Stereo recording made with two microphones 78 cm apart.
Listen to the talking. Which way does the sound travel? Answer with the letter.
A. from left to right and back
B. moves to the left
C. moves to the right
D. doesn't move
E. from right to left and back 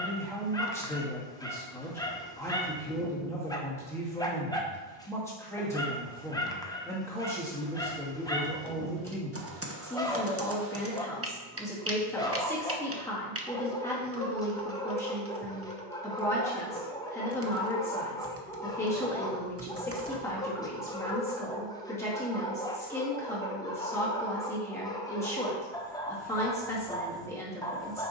D.